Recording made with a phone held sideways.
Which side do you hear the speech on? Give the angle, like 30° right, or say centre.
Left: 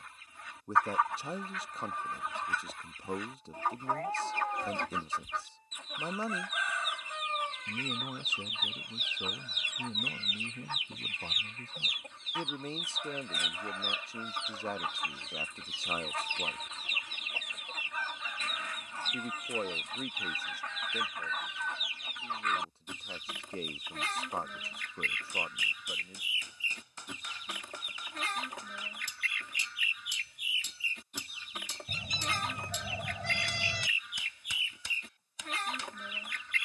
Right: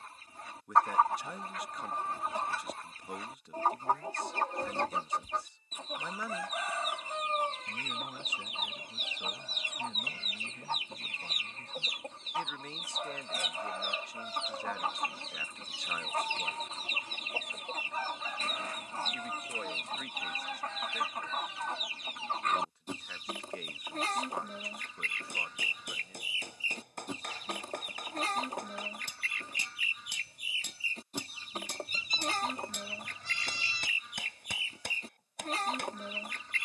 30° left.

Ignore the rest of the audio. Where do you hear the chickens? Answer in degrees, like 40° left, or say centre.
40° right.